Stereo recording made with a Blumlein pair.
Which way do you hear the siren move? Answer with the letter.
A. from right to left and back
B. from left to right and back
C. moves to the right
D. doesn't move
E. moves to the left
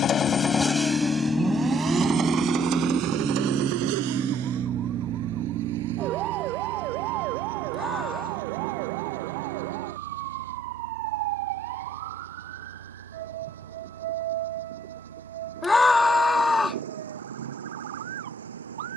C.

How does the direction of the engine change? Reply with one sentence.
In this clip you hear the engine travel towards the right.